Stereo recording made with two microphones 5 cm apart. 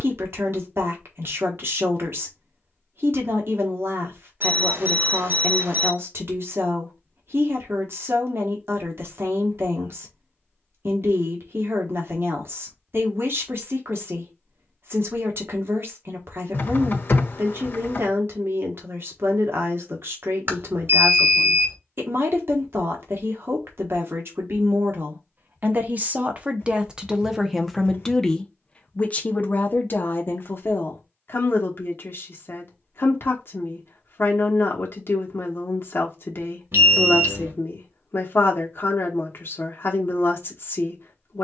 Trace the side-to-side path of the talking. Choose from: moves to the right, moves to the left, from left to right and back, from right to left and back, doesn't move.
moves to the left.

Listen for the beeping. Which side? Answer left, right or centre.
right.